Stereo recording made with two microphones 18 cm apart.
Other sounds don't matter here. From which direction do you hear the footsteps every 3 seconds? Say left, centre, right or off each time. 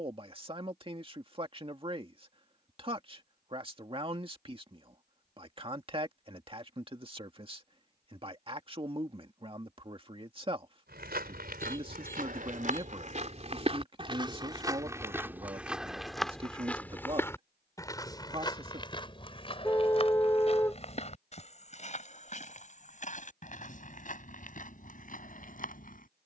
off, off, off, right, right, centre, left, left, left.